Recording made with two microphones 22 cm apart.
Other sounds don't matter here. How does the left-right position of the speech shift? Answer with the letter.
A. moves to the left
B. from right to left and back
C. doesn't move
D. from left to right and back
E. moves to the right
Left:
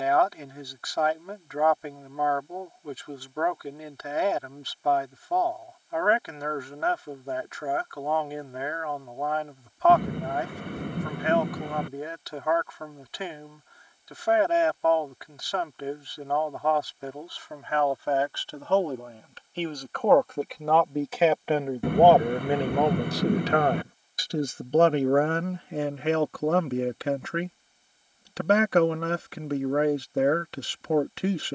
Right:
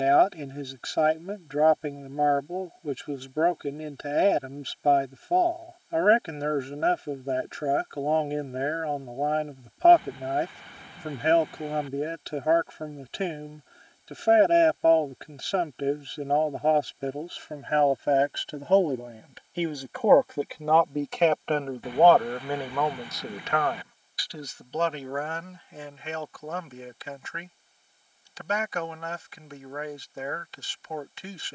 A.